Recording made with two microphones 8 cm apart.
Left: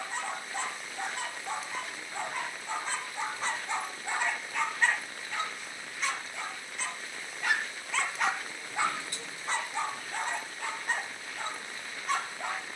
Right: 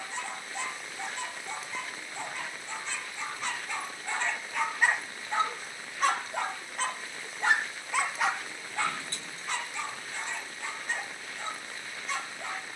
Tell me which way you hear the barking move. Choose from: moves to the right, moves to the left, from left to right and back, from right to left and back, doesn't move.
from left to right and back.